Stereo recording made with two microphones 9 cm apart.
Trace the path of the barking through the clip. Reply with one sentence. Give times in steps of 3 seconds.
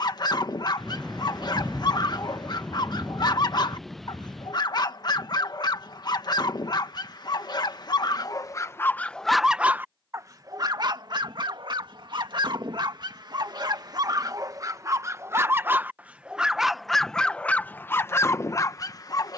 You can hear the barking on the left from 0 s, on the right from 9 s, in the centre from 15 s and on the left from 18 s.